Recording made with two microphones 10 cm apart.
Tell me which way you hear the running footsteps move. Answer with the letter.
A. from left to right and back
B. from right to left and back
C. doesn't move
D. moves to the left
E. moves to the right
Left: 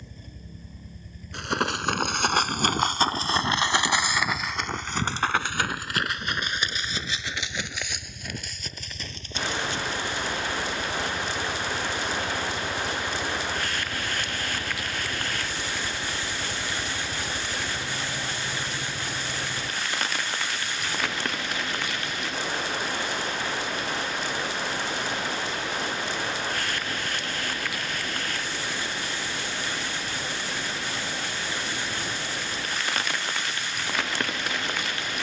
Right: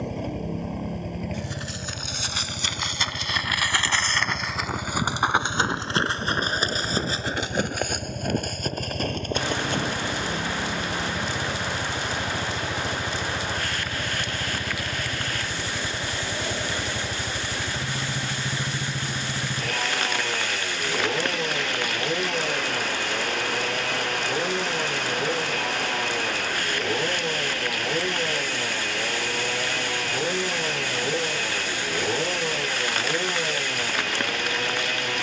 E.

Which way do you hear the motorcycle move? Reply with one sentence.
You can hear the motorcycle stay put.